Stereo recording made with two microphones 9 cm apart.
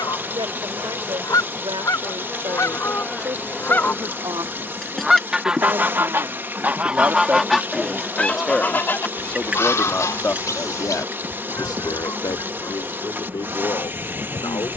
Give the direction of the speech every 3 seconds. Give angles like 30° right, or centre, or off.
60° right, 50° right, 20° right, 30° left, 60° left.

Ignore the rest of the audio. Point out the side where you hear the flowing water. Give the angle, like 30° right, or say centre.
20° right.